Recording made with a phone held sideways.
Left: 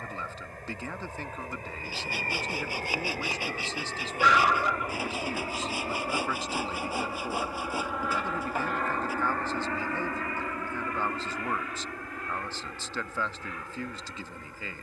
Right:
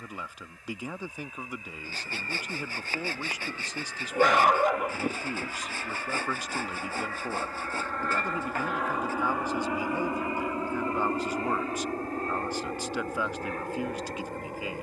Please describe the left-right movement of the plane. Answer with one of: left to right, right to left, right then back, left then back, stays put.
left to right.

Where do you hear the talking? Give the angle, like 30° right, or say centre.
10° right.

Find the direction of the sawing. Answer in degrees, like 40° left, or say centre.
10° left.